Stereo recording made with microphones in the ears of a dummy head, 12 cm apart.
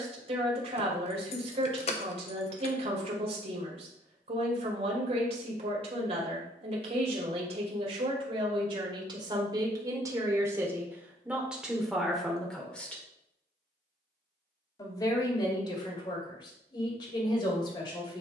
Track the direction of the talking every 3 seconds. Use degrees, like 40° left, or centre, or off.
50° right, 50° right, 50° right, 20° right, 10° left, 40° left.